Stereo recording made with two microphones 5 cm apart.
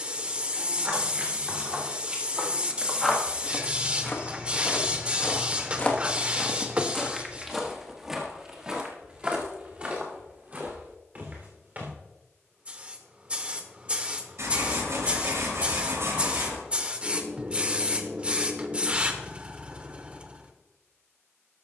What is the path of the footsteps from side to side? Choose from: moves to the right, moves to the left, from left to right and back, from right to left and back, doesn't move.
from right to left and back.